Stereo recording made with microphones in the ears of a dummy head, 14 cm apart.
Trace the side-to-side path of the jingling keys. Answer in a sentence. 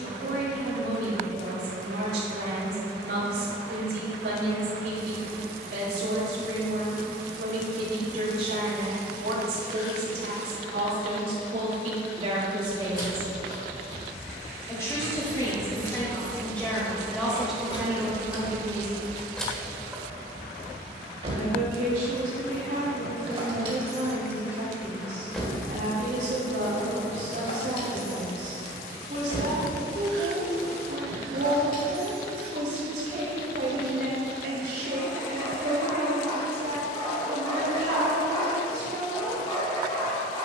You can hear the jingling keys go right and come back.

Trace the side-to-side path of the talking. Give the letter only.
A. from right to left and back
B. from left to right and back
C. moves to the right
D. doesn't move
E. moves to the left
A.